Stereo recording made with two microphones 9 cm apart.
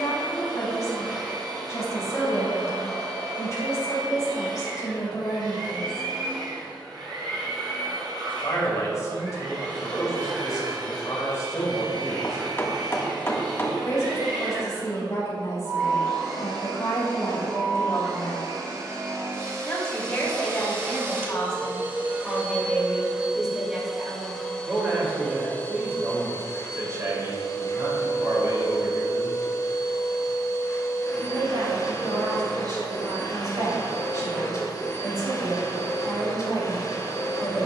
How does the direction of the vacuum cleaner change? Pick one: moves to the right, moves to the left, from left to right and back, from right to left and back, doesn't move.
moves to the left.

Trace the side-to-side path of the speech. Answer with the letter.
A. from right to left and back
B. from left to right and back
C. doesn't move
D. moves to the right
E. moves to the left
D.